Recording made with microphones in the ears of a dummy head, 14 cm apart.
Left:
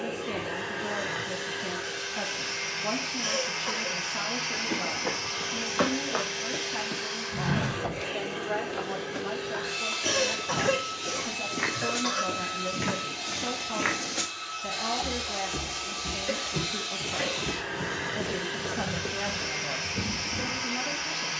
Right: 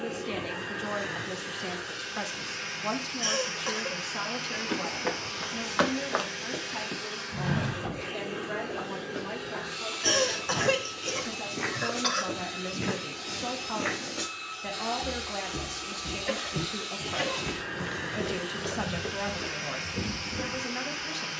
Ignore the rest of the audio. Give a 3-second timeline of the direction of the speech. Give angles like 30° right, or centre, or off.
30° right, 20° right, centre, centre, 30° right, 30° right, 30° right.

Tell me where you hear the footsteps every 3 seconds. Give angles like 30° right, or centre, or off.
off, 50° right, 10° left, 60° left, 50° left, 10° left, 40° right.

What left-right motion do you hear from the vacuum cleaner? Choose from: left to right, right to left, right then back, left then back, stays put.
stays put.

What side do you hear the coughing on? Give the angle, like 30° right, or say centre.
30° right.